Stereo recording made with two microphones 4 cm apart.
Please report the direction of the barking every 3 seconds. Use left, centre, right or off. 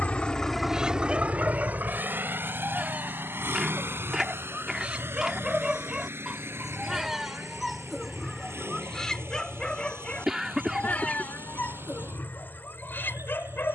right, right, centre, left, left.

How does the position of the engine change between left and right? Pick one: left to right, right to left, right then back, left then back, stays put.
left to right.